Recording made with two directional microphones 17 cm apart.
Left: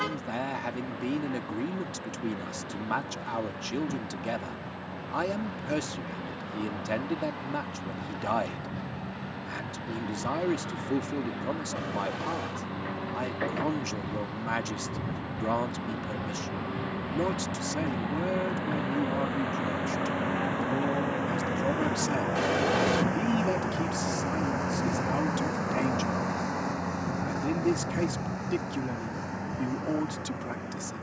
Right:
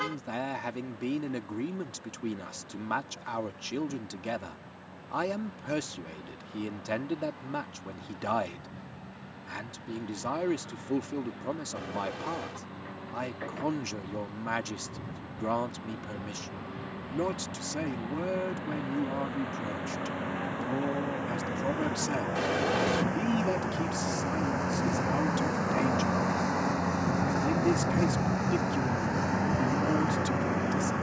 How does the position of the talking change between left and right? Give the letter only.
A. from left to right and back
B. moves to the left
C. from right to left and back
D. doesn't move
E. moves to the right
D.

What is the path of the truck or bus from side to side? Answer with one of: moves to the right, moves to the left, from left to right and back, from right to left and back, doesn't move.
moves to the right.